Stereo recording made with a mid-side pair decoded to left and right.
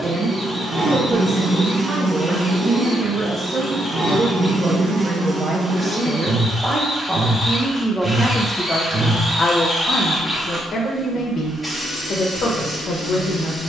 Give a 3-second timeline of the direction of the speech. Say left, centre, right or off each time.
right, right, centre, left, left.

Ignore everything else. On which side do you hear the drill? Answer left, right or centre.
centre.